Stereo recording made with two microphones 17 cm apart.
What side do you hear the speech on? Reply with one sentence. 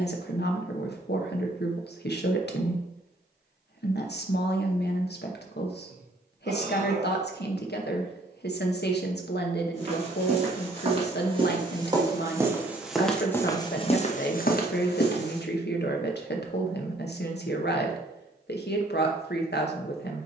In this clip you hear the speech on the left.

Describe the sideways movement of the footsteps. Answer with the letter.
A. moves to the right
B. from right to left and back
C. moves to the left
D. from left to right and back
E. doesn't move
C.